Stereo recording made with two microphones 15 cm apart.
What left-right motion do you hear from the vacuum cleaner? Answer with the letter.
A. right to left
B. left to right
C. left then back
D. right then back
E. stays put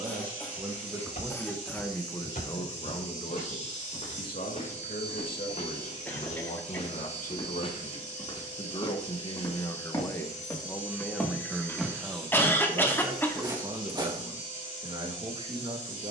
E.